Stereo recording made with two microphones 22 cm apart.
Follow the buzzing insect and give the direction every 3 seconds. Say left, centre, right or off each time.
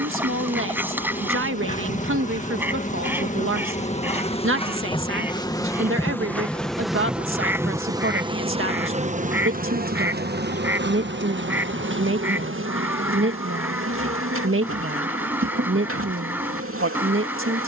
left, left, centre, right, right, right.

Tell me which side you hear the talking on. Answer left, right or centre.
right.